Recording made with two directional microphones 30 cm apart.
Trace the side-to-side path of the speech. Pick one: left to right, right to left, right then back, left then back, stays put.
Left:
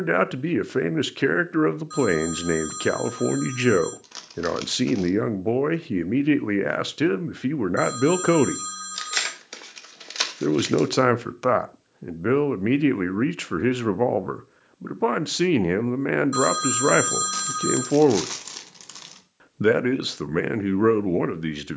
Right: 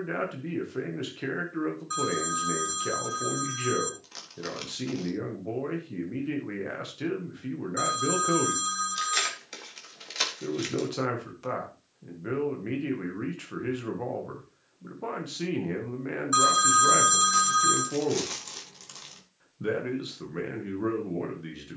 stays put.